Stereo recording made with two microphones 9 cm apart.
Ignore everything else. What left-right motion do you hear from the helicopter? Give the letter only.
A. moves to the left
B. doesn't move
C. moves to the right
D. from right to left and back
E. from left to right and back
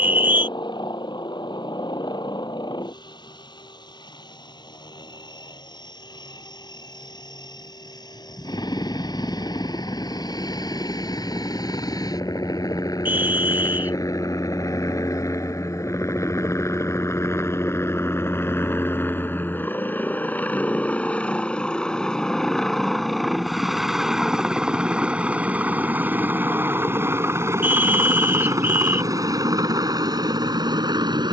C.